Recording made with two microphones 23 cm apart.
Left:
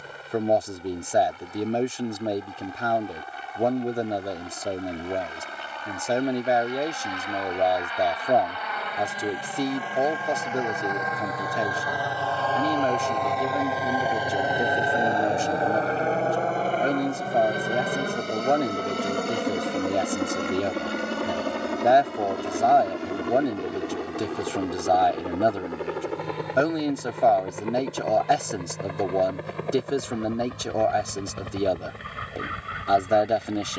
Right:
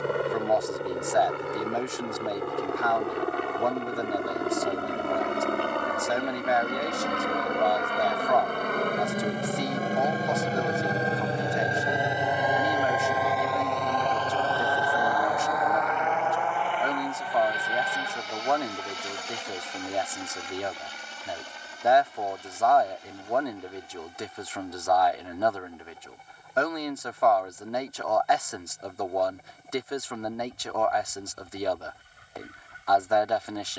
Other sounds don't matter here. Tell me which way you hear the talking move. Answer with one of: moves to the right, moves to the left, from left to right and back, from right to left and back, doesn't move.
doesn't move.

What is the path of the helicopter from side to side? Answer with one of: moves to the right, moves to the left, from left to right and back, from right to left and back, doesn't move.
moves to the left.